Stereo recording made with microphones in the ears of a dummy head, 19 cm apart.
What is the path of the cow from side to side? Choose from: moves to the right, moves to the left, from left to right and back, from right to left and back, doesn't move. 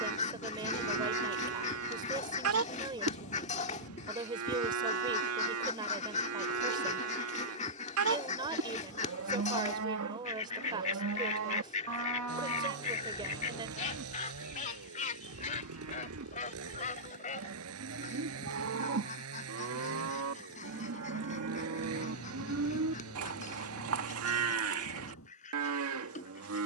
doesn't move.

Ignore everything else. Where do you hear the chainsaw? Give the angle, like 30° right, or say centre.
90° right.